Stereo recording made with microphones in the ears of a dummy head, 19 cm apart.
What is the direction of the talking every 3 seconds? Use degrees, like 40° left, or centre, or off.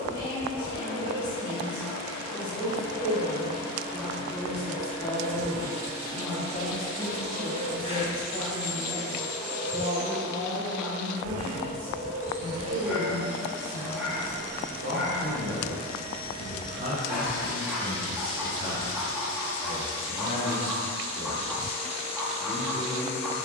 20° left, 20° left, 10° right, 40° right, 50° right, 50° right, centre, 20° left.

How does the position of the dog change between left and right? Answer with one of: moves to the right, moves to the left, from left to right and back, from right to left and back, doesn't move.
doesn't move.